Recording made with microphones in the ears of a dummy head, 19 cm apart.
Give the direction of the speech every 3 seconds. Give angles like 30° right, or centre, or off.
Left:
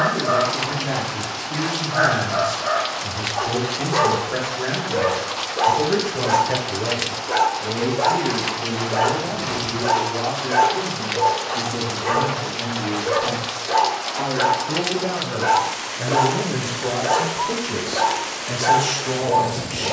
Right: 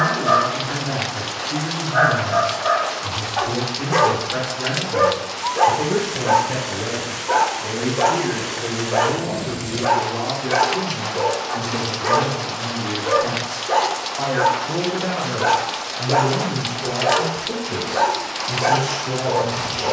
70° left, 70° left, centre, 50° right, 40° right, 30° left, 60° left.